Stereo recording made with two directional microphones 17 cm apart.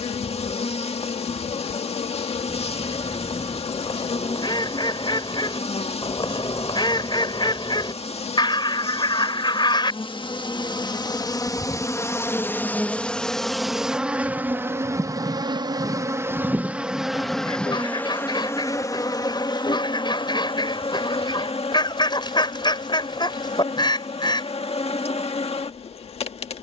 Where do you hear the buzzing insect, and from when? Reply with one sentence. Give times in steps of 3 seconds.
In this clip you hear the buzzing insect on the left from 0 s, in the centre from 12 s and on the left from 18 s.